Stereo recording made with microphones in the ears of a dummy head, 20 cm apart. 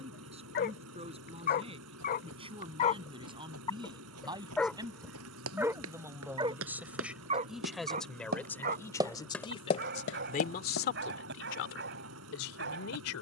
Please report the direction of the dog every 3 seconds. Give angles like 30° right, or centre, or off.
40° left, centre, 30° right, 50° right, 50° right.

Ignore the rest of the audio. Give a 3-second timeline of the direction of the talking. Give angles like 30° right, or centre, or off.
30° right, 20° right, centre, 40° left, 80° left.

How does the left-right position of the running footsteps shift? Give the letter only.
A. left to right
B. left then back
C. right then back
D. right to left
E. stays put
D.